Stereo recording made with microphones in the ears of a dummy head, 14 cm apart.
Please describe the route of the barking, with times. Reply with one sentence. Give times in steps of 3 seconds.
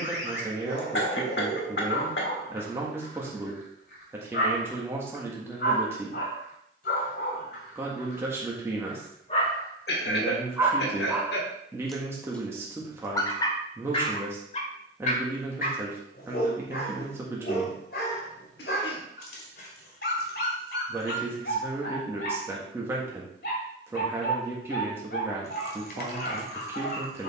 In this clip you hear the barking on the left from 0 s, in the centre from 9 s and on the left from 12 s.